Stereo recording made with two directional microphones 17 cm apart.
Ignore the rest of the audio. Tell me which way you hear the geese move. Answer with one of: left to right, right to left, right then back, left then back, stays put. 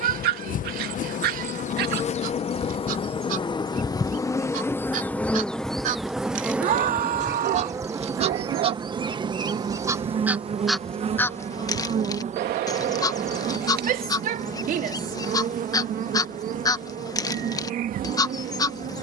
right to left.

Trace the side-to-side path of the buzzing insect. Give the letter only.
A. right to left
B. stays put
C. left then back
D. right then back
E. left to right
E.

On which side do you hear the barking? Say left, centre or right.
right.